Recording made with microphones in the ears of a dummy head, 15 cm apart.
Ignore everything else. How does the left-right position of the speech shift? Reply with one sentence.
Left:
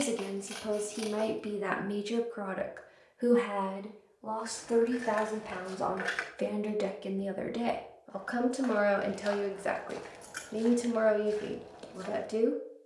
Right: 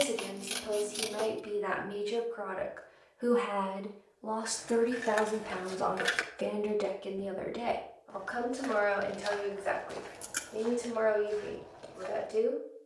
You can hear the speech go right and come back.